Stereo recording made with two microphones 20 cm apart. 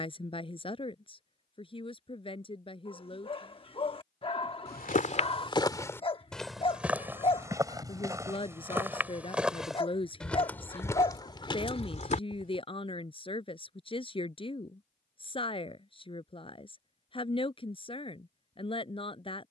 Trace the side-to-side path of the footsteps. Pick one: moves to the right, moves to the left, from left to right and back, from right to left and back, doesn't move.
from left to right and back.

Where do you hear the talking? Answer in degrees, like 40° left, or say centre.
30° left.